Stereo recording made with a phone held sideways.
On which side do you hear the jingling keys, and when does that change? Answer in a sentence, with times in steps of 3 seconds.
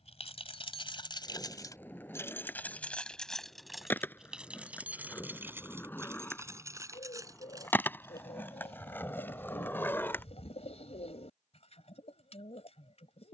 In this clip you hear the jingling keys on the left from 0 s, in the centre from 3 s, on the right from 6 s and not at all from 9 s.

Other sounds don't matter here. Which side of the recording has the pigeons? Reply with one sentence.
In this clip you hear the pigeons on the left.